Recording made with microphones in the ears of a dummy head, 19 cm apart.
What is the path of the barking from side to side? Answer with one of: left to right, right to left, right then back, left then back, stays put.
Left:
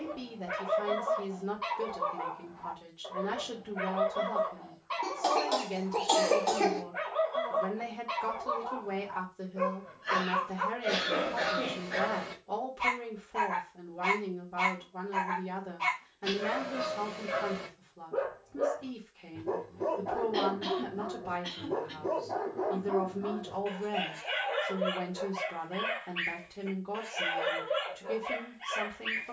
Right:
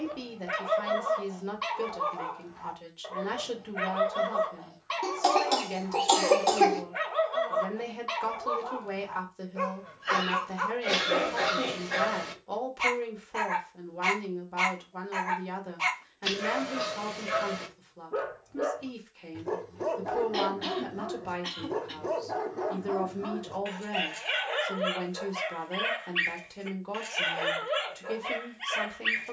stays put.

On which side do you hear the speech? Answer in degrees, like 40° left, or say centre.
40° right.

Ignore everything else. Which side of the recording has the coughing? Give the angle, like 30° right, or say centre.
30° right.